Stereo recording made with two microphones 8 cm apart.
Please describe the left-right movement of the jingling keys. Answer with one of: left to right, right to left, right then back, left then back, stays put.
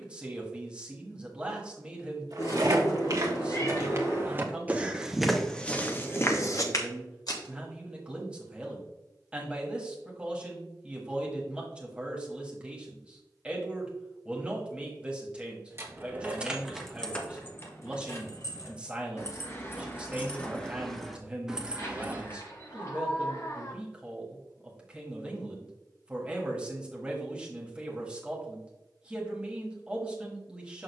left then back.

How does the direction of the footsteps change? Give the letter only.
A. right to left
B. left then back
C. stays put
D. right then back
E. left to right
A.